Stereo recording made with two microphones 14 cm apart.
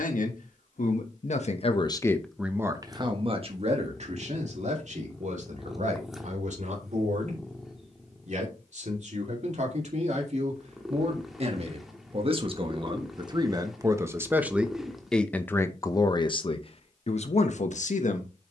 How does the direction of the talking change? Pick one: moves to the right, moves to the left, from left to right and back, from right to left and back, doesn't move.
from left to right and back.